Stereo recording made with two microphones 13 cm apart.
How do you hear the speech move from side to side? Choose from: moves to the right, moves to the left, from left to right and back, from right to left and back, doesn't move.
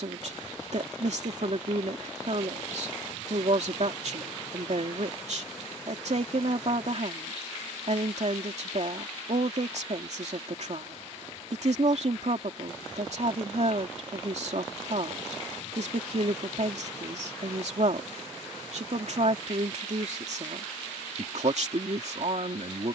doesn't move.